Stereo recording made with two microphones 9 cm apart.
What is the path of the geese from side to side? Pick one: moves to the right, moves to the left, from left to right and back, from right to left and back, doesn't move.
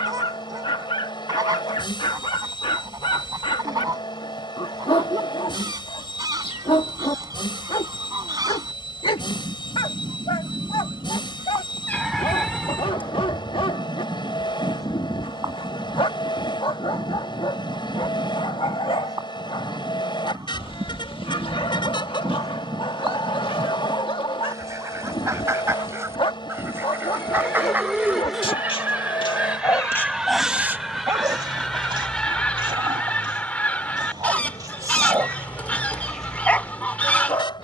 moves to the left.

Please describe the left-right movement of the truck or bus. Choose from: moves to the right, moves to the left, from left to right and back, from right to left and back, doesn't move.
doesn't move.